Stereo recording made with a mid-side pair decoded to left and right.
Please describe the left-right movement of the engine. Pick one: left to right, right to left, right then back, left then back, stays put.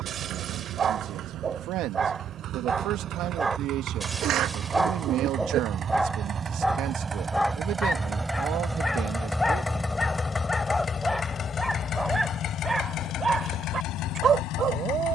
right to left.